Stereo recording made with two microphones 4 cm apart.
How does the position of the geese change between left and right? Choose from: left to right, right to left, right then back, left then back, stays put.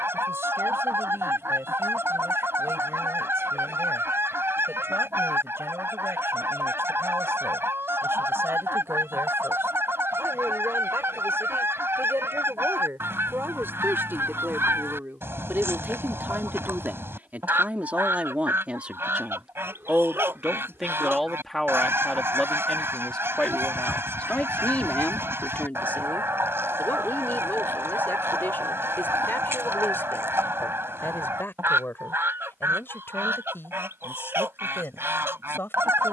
stays put.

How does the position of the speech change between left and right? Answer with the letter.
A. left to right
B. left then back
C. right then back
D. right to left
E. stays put
D.